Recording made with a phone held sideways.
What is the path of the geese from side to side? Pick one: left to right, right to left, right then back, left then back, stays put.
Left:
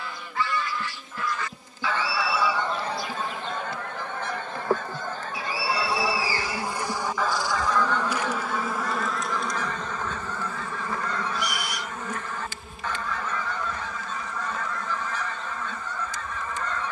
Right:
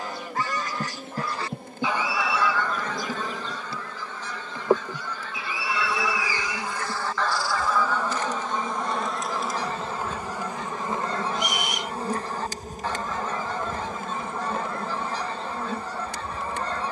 left then back.